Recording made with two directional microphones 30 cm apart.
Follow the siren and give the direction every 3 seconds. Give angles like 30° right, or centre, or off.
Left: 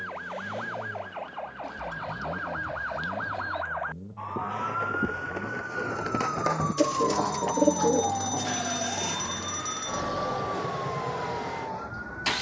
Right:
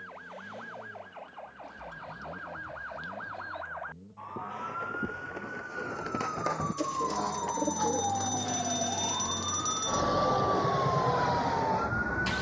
60° left, 50° left, 20° left, 30° right.